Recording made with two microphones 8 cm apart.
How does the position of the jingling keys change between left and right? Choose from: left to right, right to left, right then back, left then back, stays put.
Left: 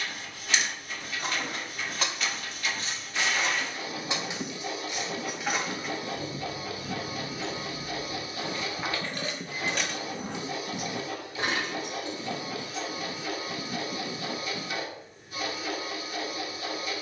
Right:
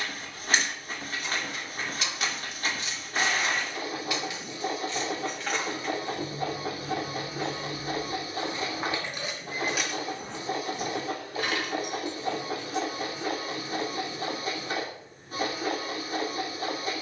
right then back.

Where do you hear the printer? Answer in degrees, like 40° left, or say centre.
40° right.